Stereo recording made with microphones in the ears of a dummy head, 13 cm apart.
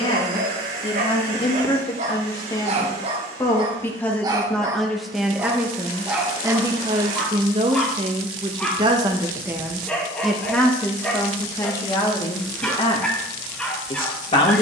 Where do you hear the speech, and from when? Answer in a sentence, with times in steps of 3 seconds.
You can hear the speech on the left from 0 s, in the centre from 3 s, on the right from 6 s, in the centre from 9 s and on the left from 12 s.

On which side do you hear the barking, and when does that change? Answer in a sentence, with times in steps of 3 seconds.
You can hear the barking on the right from 0 s and in the centre from 6 s.